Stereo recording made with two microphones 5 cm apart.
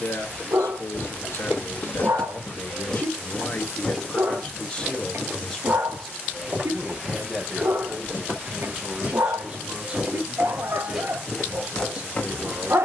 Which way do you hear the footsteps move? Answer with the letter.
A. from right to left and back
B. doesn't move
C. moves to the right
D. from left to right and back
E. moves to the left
D.